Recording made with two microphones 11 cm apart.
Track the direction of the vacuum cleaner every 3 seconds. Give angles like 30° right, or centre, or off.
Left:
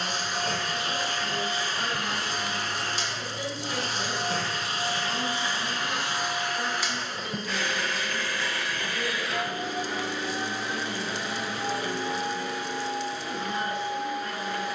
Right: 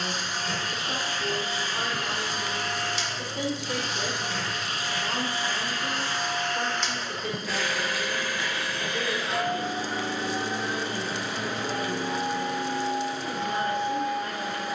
50° left, 30° left, centre, 40° right, 60° right.